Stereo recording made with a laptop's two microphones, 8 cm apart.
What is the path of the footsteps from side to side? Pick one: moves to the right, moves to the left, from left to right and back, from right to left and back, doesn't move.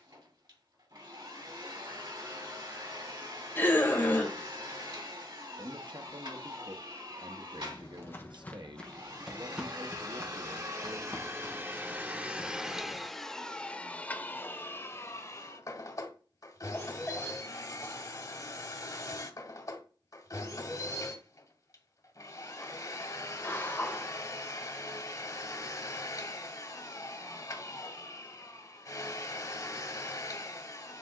from left to right and back.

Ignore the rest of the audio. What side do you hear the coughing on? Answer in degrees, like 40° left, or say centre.
30° left.